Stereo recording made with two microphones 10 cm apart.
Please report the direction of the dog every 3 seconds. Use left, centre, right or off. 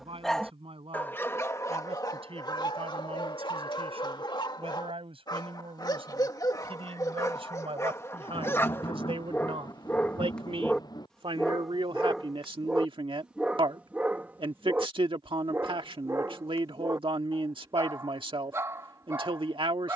left, left, left, centre, centre, right, right.